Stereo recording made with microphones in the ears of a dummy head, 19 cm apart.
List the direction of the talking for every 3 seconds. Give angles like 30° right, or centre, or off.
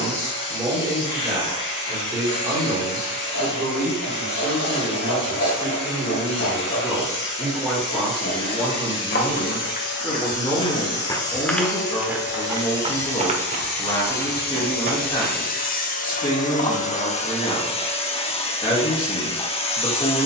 10° right, 10° right, centre, 10° left, 20° left, 20° left, 20° left.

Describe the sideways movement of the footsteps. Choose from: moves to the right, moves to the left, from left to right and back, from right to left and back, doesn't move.
moves to the right.